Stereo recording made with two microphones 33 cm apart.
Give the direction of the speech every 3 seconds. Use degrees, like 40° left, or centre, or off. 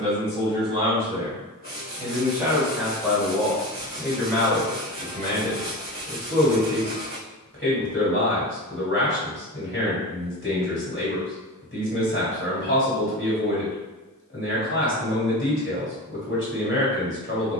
10° right, 10° left, 30° left, 30° left, 30° left, 30° left.